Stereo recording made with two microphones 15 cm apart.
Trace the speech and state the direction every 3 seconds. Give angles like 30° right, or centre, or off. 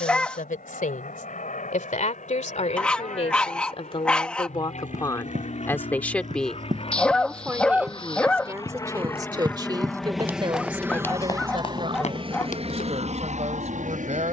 60° left, 30° left, 10° right, 30° right, 50° right.